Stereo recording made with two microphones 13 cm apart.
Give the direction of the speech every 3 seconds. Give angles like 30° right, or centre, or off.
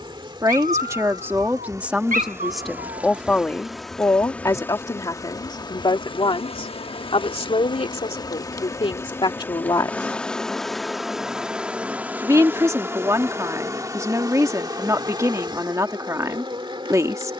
10° right, 20° left, 40° left, 30° left, 20° right, 20° right.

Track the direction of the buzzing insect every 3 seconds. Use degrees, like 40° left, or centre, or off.
30° right, 10° left, 30° left, centre, 20° right, 30° right.